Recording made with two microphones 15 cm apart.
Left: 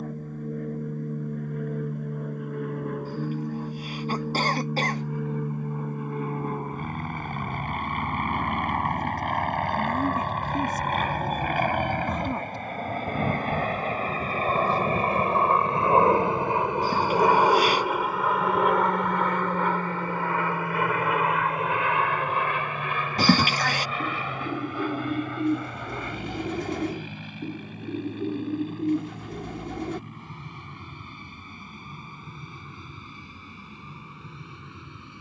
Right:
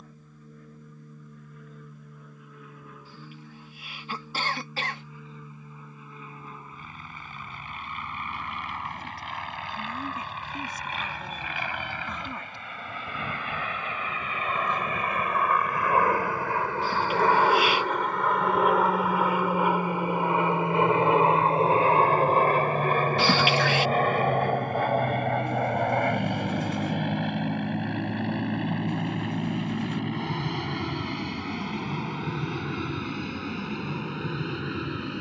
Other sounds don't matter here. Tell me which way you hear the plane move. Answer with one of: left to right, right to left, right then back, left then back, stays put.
left to right.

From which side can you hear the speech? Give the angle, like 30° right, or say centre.
40° left.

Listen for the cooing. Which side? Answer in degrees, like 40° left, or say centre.
70° left.